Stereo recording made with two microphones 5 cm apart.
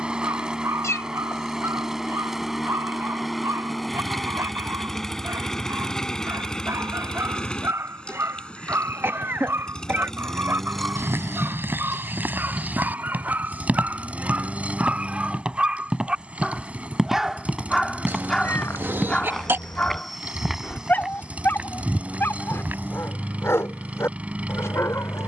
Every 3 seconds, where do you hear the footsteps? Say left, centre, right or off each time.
off, off, off, right, right, centre, centre, right, off.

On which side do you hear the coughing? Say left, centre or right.
right.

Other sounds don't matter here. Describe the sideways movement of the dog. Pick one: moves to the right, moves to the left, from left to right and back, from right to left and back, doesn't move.
moves to the left.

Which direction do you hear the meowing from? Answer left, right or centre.
left.